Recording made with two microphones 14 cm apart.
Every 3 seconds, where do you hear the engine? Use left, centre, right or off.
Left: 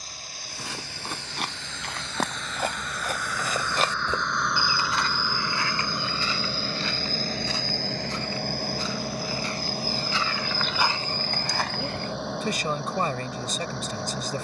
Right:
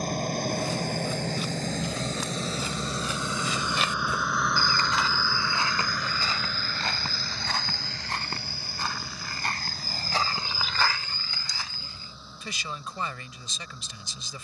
right, centre, left, left, left.